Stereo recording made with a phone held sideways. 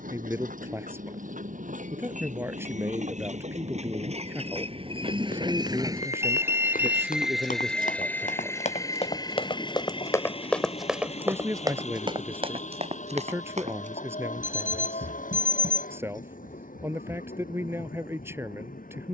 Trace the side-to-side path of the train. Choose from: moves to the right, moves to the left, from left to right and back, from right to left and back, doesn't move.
moves to the left.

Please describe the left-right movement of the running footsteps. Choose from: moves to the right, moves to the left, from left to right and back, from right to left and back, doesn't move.
moves to the right.